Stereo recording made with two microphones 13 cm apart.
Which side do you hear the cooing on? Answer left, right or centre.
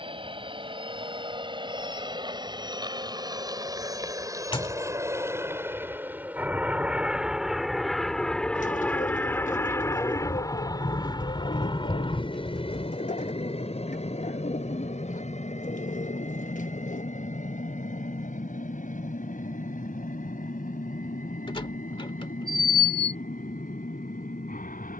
left.